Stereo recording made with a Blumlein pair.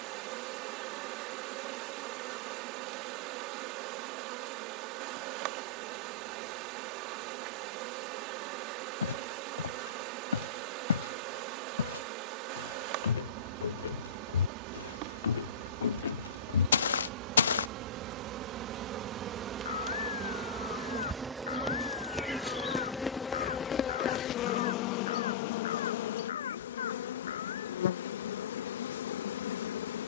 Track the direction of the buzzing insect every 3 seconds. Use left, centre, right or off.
right, right, right, right, right, right, right, centre, left, left.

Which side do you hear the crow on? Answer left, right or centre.
left.